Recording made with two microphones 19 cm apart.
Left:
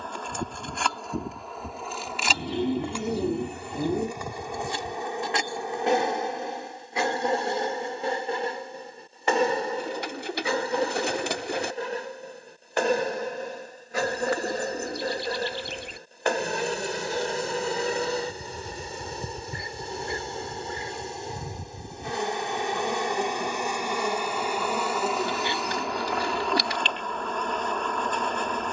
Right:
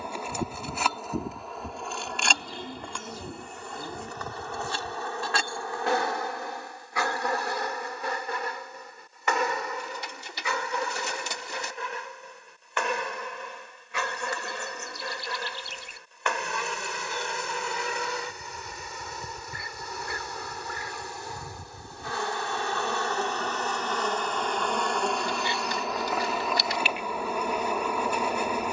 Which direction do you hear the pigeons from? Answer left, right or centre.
left.